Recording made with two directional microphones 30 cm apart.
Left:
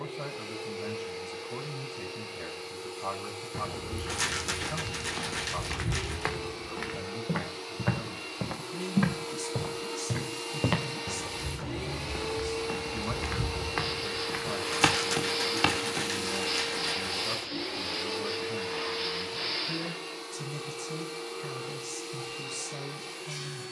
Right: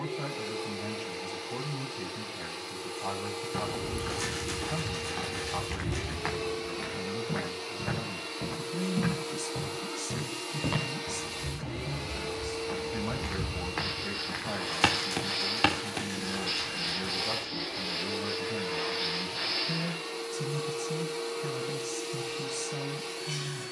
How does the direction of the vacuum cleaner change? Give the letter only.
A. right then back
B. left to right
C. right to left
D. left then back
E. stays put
D.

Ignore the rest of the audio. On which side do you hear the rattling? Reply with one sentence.
You can hear the rattling on the left.